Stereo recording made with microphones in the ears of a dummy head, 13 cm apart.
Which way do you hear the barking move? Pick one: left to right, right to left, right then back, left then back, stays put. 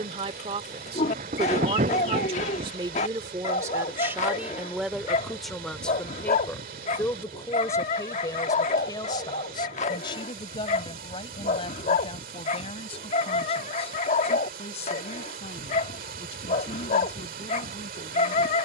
stays put.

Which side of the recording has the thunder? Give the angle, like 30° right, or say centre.
50° right.